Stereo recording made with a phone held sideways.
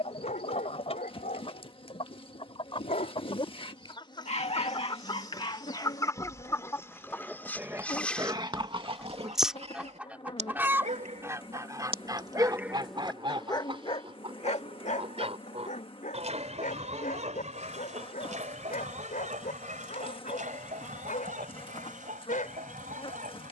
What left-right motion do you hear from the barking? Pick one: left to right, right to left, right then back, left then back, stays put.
right then back.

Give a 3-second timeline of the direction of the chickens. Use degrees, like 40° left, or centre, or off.
50° left, 30° left, 20° left, 10° right, 40° right, 60° right, 70° right, 70° right.